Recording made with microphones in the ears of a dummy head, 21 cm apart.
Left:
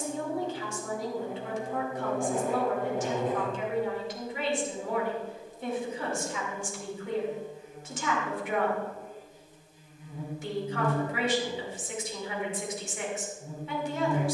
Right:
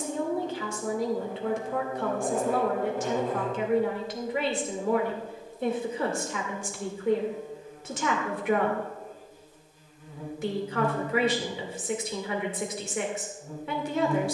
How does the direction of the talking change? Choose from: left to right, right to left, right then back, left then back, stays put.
stays put.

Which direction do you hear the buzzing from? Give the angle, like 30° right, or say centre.
20° left.